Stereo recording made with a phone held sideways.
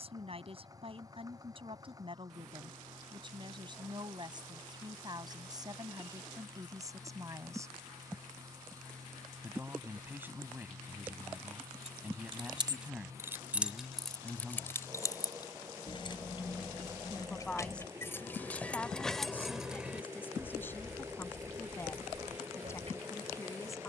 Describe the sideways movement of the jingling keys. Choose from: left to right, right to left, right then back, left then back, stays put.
left then back.